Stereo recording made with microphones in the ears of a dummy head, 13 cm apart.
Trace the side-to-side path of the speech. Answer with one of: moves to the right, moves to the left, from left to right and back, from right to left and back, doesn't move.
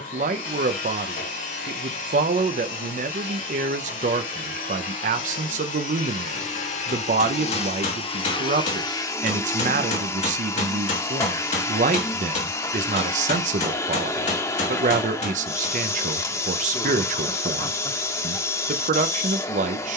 doesn't move.